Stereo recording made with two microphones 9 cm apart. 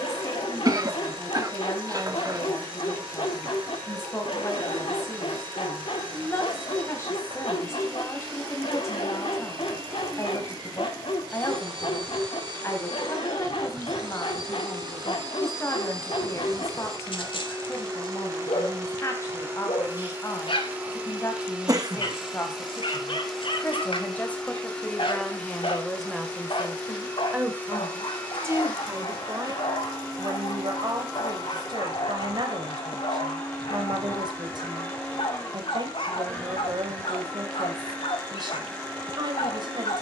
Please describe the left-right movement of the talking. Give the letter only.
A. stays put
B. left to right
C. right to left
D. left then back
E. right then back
B.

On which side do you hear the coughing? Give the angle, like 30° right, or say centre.
40° right.